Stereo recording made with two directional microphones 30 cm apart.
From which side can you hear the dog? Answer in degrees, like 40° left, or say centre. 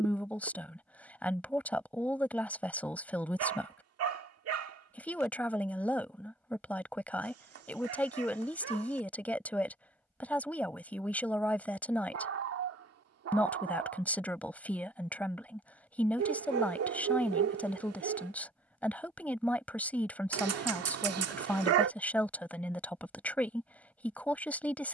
50° right.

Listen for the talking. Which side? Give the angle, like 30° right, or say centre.
centre.